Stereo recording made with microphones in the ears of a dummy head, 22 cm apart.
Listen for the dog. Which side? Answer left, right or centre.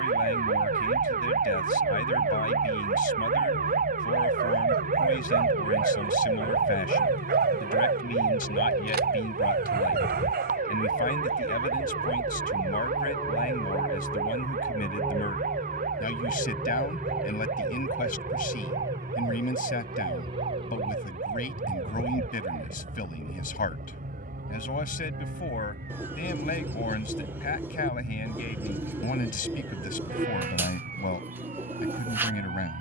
right.